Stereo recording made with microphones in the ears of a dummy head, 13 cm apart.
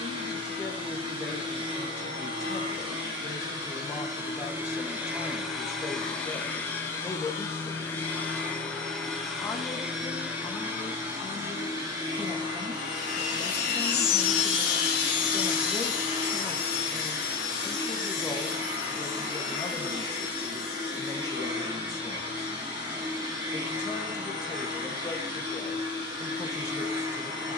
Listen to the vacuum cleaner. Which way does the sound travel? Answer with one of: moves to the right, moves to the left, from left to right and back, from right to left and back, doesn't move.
from right to left and back.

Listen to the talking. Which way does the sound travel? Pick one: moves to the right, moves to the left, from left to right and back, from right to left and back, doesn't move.
doesn't move.